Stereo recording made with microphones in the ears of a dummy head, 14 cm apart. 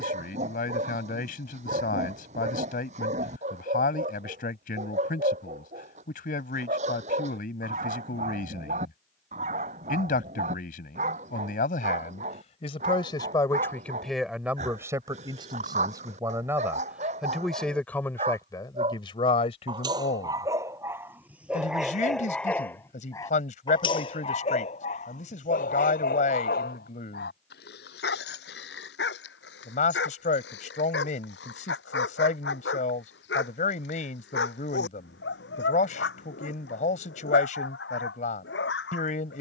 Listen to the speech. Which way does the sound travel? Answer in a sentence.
You can hear the speech go right and come back.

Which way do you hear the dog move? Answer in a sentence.
You can hear the dog go from the right side to the left.